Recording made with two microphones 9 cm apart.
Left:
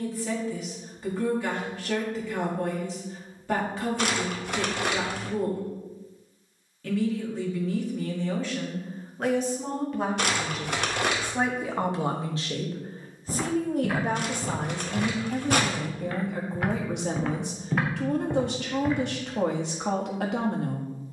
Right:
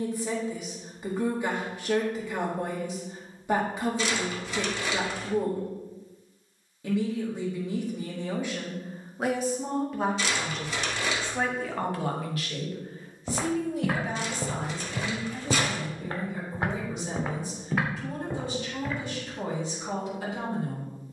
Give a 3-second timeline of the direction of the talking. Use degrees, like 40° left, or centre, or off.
20° right, 20° right, 20° right, centre, 50° left, 70° left, 80° left.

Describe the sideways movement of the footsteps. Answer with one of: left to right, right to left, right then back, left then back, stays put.
right to left.